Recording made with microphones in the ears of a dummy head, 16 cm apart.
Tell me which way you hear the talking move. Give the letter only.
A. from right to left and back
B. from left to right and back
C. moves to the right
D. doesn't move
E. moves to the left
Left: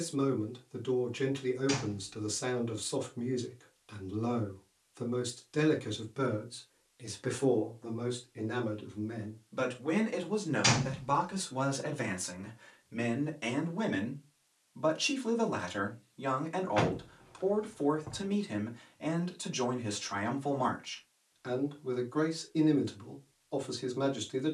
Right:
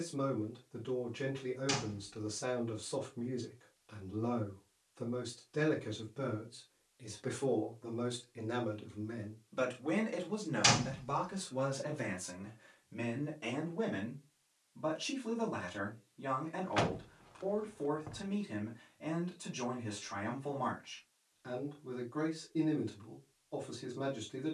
B.